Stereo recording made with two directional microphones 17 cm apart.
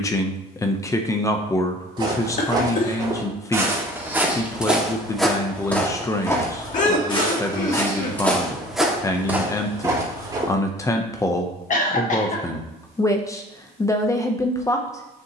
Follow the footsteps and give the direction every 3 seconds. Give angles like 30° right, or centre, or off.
30° right, centre, 20° left, 20° right, off.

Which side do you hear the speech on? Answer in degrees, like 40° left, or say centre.
20° left.